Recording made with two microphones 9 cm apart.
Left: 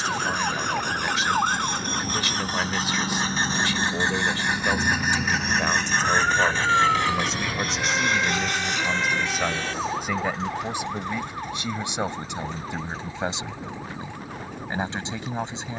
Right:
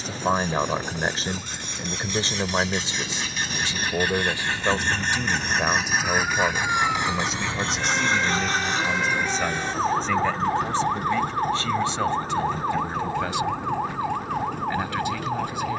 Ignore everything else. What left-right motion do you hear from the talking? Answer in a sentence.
In this clip you hear the talking move to the left.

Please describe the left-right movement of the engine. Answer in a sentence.
In this clip you hear the engine move to the right.